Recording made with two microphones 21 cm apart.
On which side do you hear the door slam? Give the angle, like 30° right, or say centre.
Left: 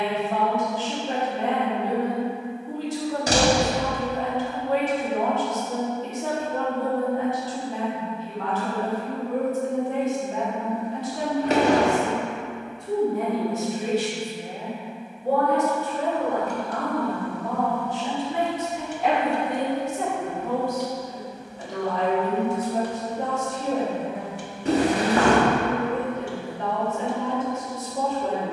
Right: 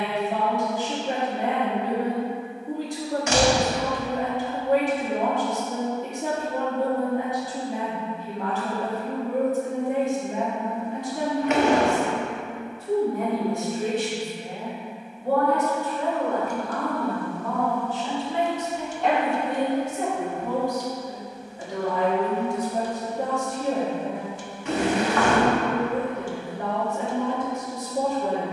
40° left.